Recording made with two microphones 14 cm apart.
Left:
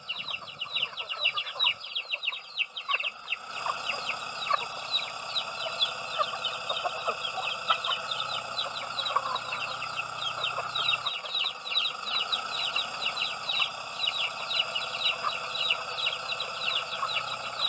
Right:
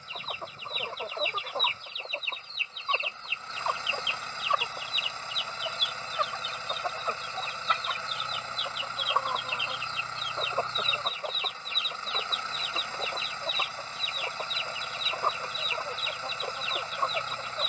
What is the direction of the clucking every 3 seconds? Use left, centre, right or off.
right, centre, centre, right, right, right.